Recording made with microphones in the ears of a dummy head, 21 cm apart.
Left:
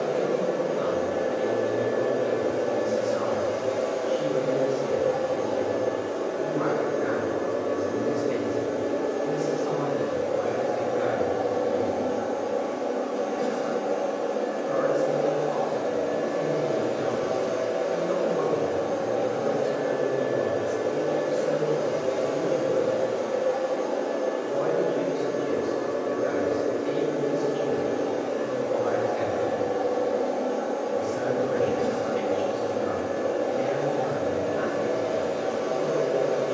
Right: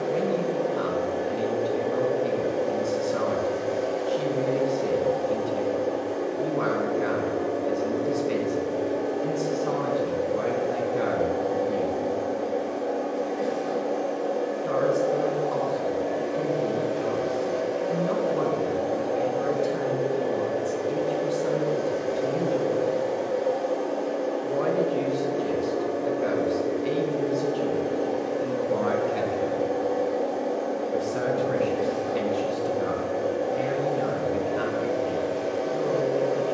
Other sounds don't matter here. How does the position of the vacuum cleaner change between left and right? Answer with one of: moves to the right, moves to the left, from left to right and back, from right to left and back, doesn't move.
doesn't move.